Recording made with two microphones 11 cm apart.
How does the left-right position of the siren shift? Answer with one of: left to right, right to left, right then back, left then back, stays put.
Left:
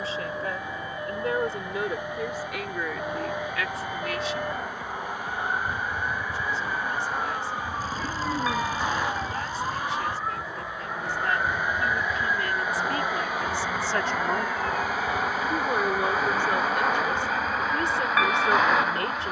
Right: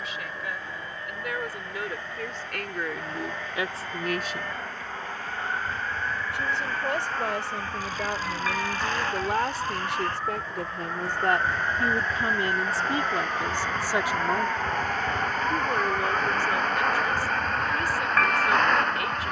left to right.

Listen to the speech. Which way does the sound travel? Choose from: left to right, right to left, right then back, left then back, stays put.
right then back.